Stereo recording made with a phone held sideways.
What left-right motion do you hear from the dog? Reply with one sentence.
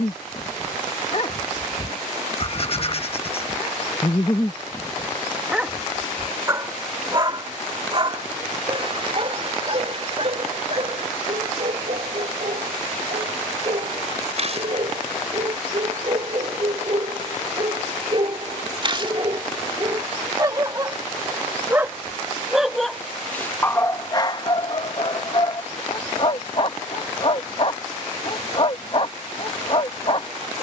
In this clip you hear the dog go right and come back.